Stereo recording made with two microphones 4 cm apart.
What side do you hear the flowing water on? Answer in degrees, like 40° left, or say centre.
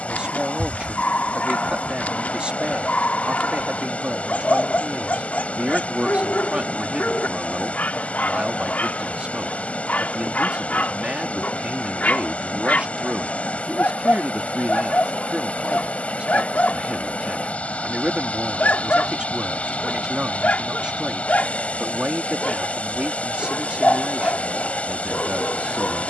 30° left.